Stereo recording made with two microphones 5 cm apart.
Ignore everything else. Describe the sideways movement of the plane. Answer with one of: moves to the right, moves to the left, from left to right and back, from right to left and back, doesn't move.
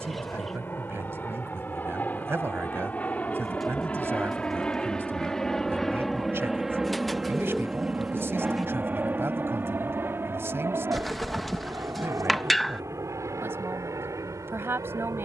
moves to the right.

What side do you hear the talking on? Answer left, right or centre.
right.